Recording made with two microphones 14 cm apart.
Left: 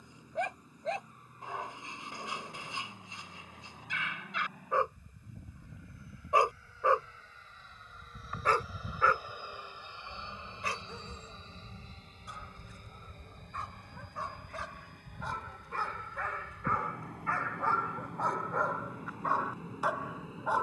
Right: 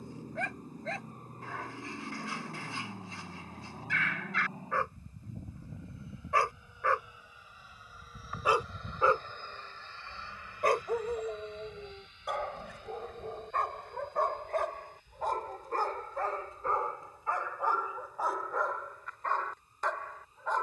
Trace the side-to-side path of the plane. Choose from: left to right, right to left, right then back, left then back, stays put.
right to left.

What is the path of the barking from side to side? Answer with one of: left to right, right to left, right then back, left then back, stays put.
right then back.